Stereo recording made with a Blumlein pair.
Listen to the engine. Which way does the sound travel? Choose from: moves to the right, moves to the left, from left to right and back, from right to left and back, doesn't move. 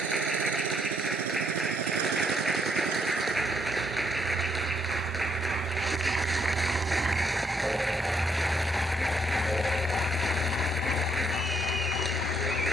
moves to the left.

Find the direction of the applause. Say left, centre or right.
centre.